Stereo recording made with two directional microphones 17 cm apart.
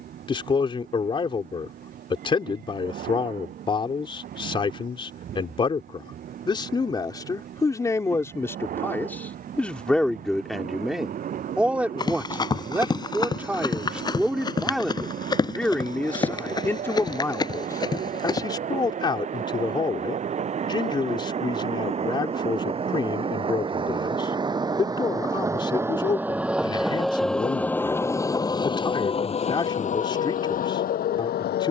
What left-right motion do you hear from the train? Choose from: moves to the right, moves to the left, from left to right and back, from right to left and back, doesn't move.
moves to the left.